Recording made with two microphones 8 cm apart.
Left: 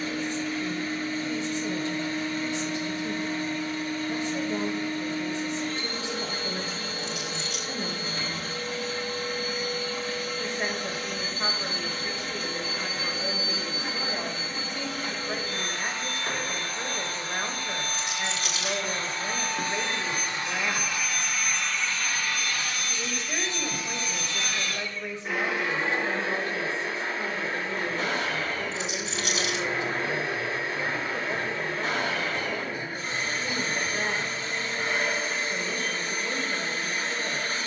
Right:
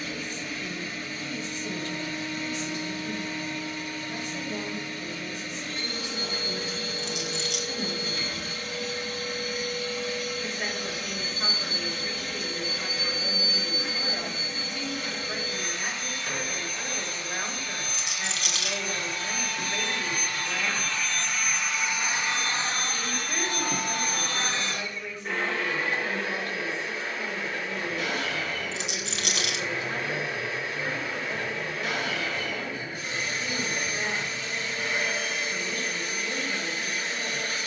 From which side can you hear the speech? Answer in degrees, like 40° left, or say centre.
30° left.